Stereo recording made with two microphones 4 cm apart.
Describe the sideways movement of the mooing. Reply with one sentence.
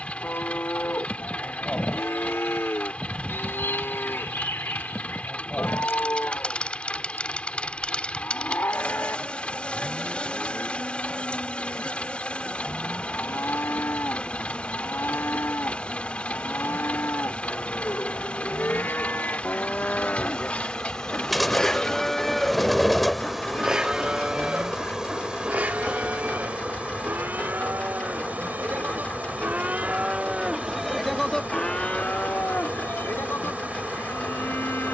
In this clip you hear the mooing move from left to right and back again.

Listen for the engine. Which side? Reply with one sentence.
You can hear the engine on the left.